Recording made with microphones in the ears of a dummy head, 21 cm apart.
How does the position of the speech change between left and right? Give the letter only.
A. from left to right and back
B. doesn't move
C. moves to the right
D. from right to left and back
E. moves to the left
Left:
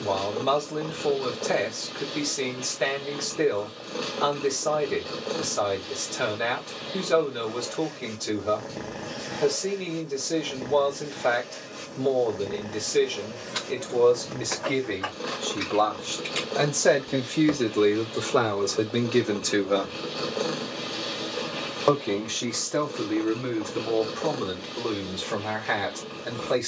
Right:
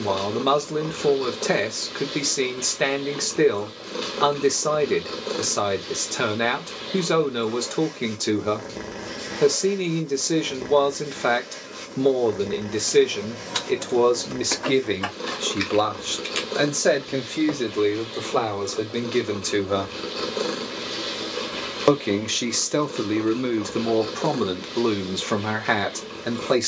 D.